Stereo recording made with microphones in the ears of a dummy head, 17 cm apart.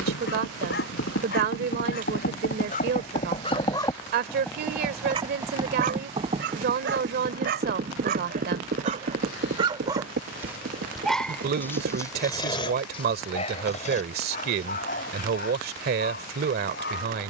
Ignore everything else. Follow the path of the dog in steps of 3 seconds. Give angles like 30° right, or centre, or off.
50° left, 10° right, 50° right, 10° right, 30° left, 50° left.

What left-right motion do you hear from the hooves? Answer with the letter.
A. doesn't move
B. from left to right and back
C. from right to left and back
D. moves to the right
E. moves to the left
D.